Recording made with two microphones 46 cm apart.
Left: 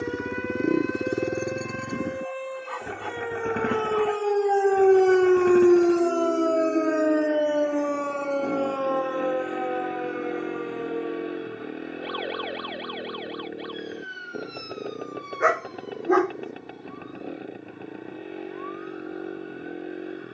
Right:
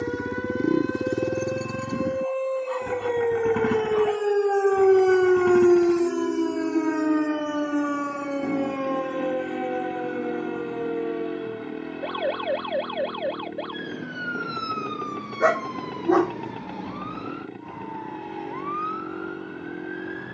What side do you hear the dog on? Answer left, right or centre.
right.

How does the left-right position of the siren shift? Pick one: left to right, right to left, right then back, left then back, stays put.
left to right.